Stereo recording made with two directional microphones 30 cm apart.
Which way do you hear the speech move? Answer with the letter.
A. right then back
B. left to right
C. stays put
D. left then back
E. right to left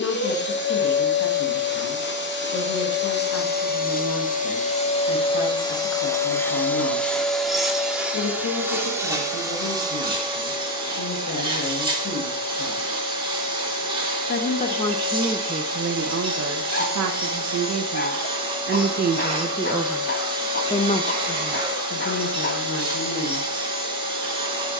A.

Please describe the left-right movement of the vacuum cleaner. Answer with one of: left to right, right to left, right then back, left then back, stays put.
left to right.